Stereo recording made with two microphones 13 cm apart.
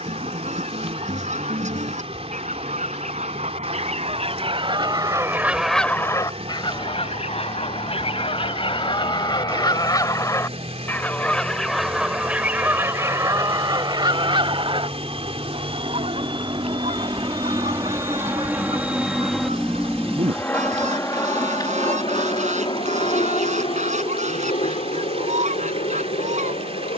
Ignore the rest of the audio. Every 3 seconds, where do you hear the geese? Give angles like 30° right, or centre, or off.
70° right, 40° right, 40° left, 20° left, 30° right, 60° right, 70° right, 70° right, 70° right.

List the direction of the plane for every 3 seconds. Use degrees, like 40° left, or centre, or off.
80° right, 70° right, 70° right, 70° right, 60° right, 40° right, centre, 40° left, 60° left.